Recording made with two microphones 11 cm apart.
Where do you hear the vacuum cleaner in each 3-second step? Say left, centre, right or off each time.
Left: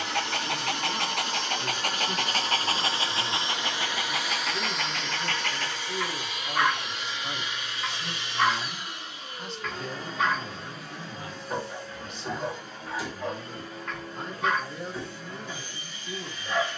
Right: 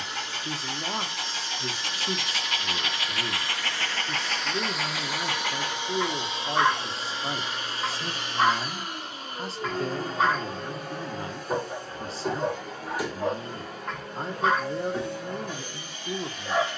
left, centre, right, right, right, right.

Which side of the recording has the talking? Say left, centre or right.
right.